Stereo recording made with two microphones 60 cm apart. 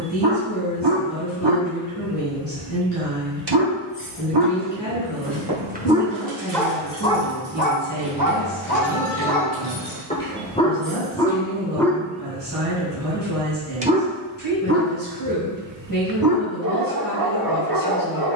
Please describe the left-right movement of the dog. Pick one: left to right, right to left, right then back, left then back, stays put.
left then back.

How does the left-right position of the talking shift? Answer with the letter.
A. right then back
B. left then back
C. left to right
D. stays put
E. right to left
D.